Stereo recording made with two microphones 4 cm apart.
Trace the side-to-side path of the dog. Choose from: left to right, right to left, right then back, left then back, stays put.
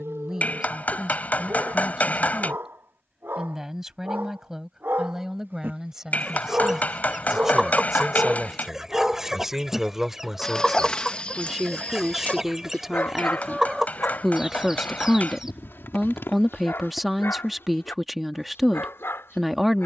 right to left.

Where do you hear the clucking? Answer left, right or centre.
centre.